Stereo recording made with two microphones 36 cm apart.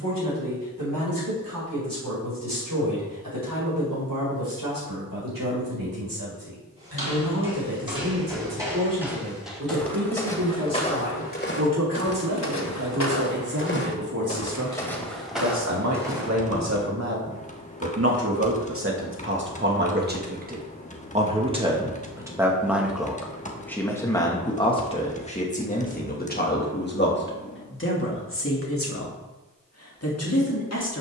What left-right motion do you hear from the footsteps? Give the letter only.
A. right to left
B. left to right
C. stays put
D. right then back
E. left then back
E.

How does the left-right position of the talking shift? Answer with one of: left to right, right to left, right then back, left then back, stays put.
right to left.